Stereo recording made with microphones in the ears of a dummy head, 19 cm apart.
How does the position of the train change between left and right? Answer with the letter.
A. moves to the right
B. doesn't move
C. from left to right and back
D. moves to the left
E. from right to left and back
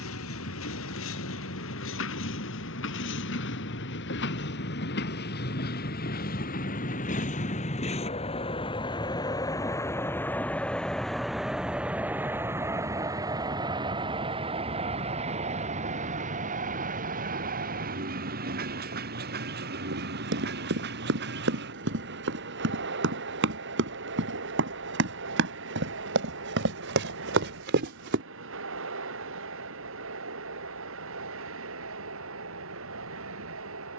A.